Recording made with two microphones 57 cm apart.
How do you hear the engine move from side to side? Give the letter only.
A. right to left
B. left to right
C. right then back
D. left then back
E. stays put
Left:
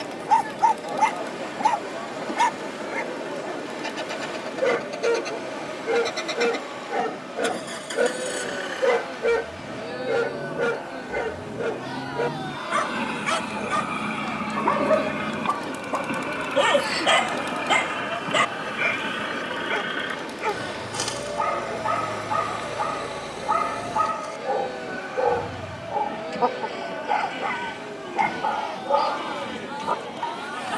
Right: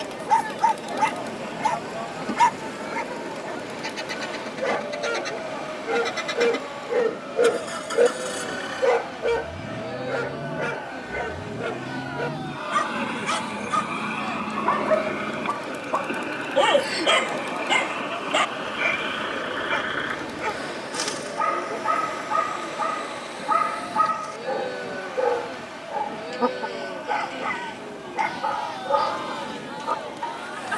A.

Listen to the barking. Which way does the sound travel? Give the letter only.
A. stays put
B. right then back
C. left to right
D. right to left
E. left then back
E.